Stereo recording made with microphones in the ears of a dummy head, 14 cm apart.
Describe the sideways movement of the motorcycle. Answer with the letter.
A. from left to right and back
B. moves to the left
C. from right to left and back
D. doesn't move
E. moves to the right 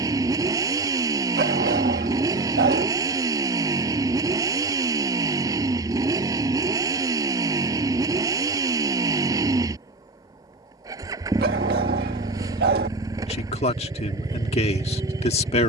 D.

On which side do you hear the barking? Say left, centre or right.
right.